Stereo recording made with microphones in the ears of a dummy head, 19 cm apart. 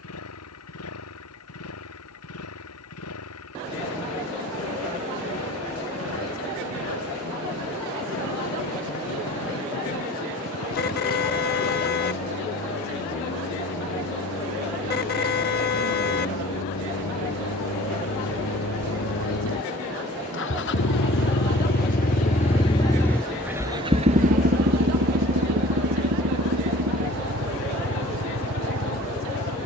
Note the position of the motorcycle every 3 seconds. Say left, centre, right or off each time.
left, left, left, left, left, left, left, left, right, right.